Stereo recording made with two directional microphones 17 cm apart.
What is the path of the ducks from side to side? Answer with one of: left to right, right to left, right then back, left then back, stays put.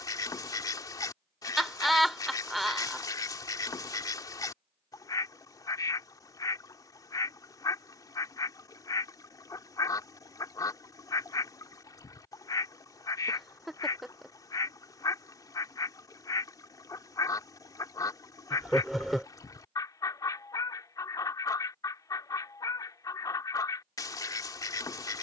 stays put.